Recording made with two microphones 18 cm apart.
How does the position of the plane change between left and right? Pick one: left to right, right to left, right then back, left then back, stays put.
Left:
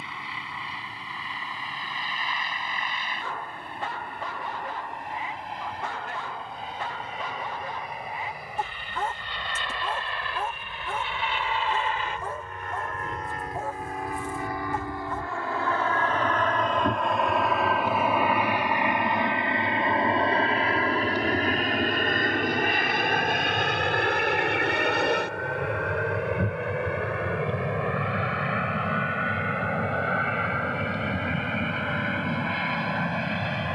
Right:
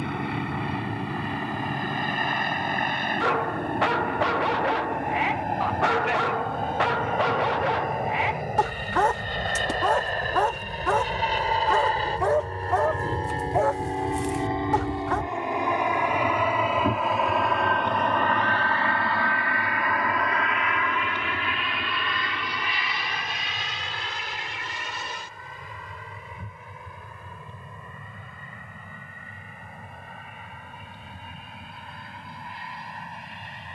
right to left.